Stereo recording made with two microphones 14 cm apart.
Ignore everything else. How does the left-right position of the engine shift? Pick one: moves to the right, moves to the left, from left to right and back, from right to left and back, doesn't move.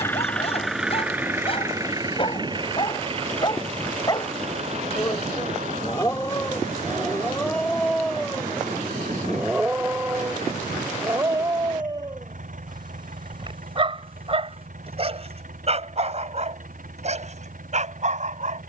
moves to the right.